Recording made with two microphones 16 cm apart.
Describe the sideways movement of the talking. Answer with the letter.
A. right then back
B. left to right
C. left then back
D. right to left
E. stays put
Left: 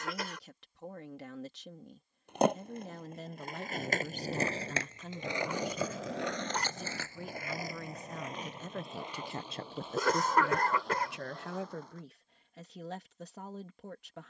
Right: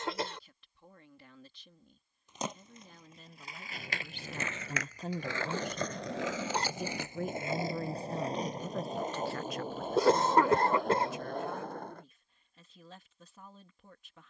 A.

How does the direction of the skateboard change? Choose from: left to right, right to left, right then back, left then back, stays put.
left to right.